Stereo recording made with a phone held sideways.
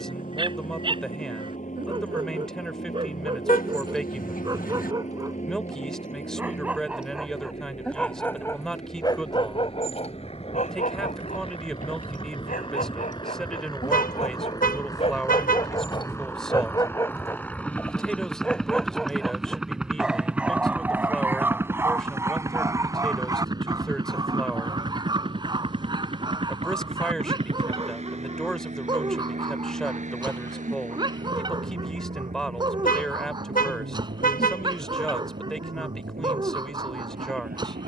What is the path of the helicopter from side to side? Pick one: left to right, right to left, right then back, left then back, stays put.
left to right.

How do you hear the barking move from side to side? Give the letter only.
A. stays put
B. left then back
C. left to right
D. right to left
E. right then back
B.